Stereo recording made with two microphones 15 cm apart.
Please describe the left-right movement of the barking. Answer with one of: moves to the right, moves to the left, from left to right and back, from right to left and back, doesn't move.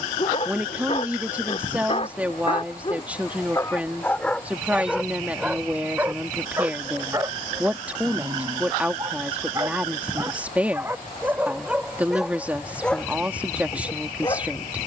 from left to right and back.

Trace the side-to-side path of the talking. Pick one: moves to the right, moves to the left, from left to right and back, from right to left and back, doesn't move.
doesn't move.